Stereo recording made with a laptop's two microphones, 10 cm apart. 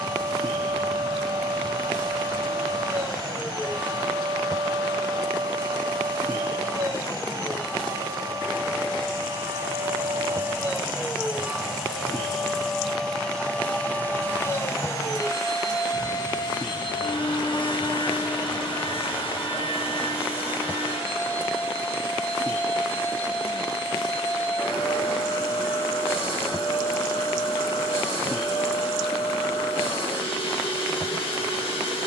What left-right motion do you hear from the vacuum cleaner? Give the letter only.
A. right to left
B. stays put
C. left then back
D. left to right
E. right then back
A.